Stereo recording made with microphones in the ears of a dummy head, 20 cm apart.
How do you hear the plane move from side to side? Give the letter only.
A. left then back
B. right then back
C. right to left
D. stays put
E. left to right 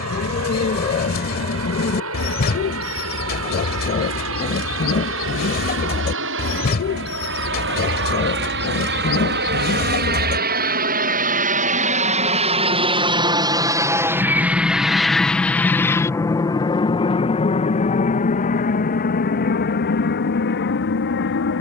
C.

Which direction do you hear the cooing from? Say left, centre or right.
left.